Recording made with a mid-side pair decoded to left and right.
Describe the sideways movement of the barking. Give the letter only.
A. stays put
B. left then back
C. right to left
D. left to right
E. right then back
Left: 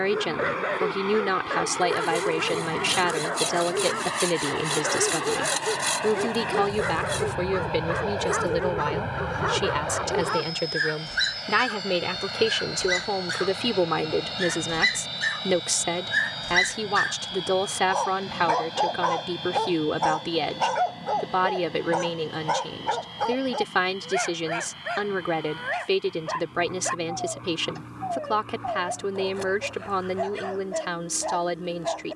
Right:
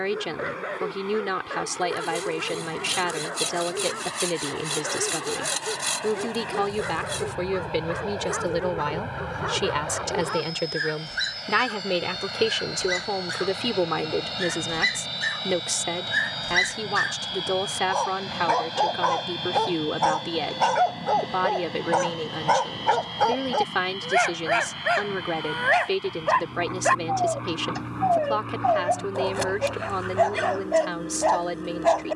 D.